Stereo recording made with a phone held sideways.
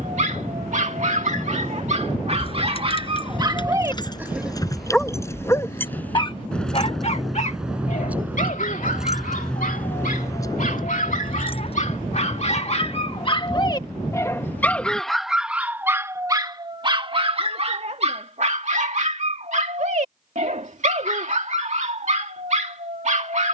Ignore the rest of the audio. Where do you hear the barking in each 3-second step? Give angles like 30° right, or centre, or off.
50° right, 10° right, 50° left, 60° left, 30° left, 20° right, 50° right, 50° right.